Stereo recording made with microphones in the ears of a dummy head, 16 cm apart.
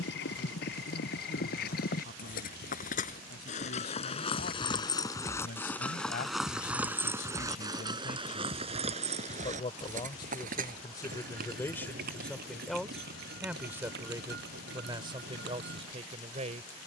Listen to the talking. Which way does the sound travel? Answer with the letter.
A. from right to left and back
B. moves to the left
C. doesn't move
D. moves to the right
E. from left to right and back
D.